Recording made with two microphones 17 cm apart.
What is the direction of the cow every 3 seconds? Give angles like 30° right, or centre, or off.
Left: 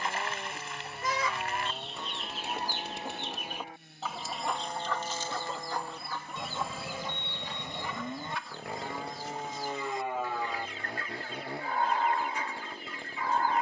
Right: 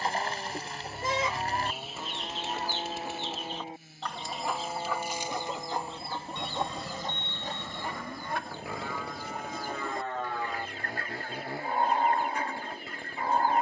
40° right, 20° right, 20° left, 10° left, 30° right.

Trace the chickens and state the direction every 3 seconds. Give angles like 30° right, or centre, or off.
10° right, centre, 40° right, 50° right, 50° right.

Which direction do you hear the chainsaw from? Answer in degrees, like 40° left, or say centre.
centre.